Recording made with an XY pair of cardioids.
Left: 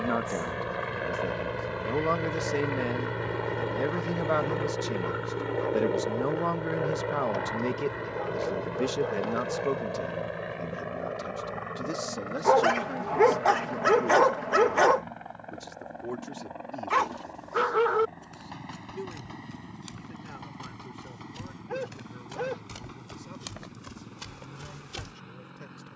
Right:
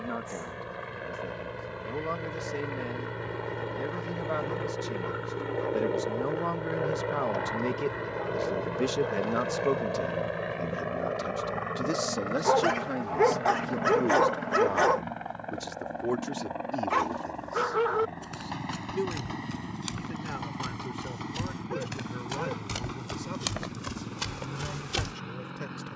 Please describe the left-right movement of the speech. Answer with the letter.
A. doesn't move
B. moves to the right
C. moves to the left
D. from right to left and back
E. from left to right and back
B.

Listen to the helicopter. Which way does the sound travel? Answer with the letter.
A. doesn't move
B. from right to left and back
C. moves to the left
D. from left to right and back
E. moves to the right
E.